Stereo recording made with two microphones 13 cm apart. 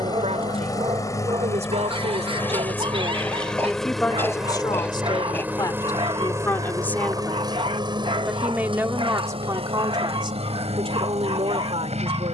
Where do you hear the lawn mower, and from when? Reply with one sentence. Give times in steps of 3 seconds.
You can hear the lawn mower on the left from 0 s, in the centre from 3 s and on the right from 6 s.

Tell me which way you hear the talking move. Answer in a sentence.
You can hear the talking go left and come back.